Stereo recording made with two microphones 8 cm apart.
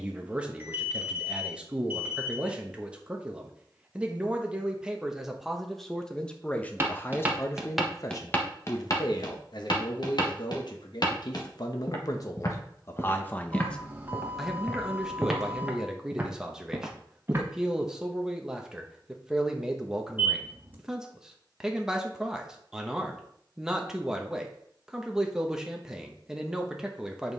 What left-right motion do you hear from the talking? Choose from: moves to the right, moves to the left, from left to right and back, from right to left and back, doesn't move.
from right to left and back.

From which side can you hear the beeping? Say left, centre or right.
right.